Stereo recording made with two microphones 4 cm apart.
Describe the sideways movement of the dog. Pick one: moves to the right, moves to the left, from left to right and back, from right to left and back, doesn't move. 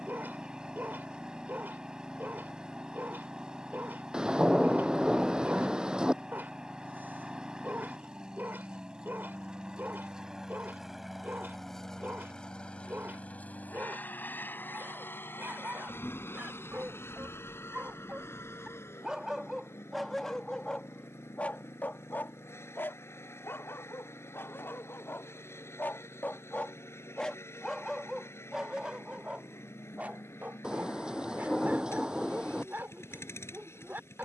from right to left and back.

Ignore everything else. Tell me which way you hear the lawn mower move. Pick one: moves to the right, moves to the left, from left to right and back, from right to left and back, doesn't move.
moves to the left.